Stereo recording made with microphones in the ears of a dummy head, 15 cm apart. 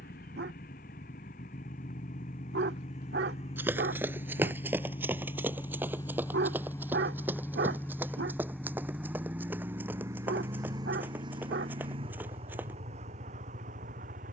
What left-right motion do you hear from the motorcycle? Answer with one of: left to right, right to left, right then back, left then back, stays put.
left to right.